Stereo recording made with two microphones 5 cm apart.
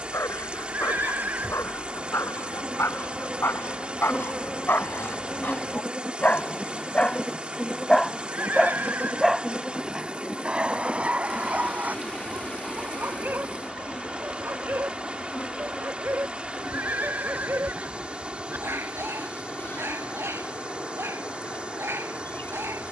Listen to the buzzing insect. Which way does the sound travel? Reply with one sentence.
You can hear the buzzing insect travel towards the left.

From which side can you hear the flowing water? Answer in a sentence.
In this clip you hear the flowing water on the right.